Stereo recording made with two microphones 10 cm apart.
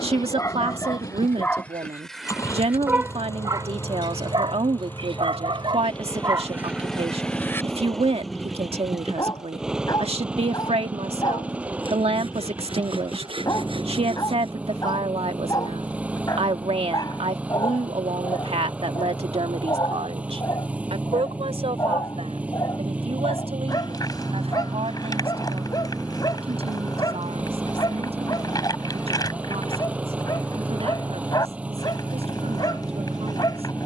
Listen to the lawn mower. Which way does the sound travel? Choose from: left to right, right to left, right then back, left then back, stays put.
left to right.